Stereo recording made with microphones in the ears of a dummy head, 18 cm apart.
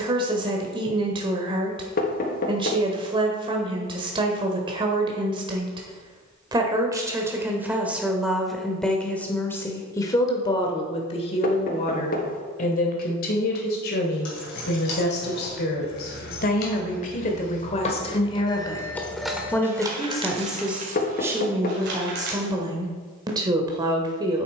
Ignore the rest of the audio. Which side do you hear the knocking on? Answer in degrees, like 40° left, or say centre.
40° left.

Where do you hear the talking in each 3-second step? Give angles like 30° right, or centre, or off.
20° right, 20° right, 10° right, 20° left, 50° left, 40° left, 10° left, 20° right.